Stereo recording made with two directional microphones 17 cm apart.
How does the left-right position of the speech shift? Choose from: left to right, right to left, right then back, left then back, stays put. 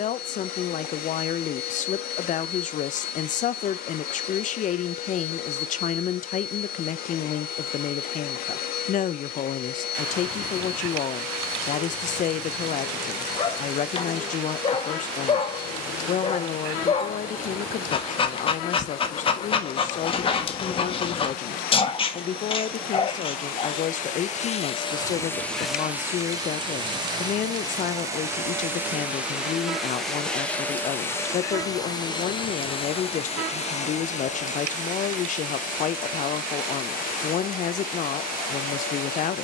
stays put.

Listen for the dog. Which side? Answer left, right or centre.
left.